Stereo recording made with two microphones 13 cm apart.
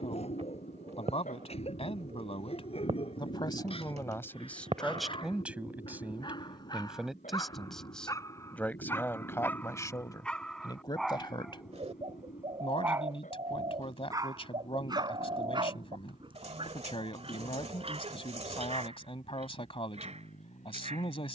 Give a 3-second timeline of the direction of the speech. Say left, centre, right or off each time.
left, centre, centre, left, left, left, left.